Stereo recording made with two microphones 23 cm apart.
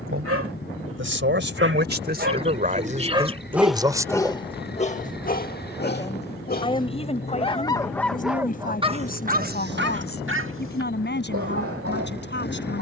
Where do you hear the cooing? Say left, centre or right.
right.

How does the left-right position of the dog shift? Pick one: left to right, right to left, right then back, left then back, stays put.
left then back.